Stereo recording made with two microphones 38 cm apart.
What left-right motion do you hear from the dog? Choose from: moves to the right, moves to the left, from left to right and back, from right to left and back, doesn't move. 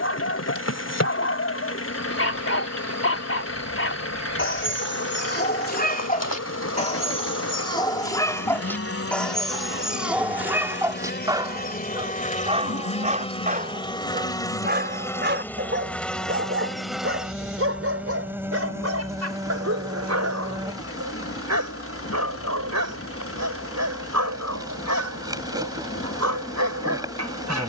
moves to the right.